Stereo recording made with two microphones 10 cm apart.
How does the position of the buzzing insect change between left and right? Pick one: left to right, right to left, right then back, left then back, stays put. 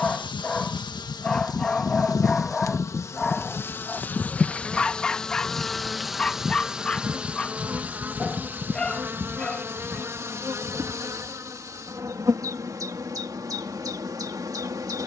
left to right.